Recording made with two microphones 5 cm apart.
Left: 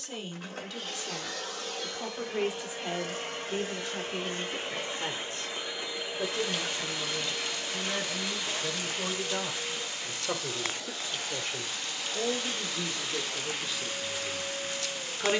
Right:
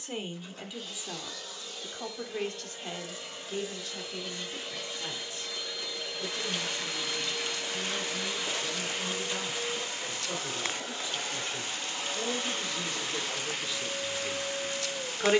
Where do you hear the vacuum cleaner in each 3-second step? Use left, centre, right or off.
left, left, centre, right, right.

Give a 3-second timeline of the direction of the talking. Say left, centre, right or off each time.
centre, left, left, left, centre.